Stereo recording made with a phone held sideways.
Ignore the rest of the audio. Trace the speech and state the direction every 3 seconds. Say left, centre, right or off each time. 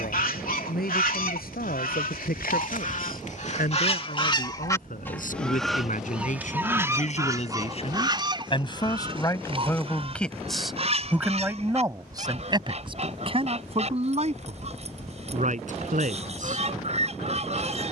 left, left, left, centre, right, right.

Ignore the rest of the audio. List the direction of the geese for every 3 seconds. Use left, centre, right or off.
left, left, right, right, right, right.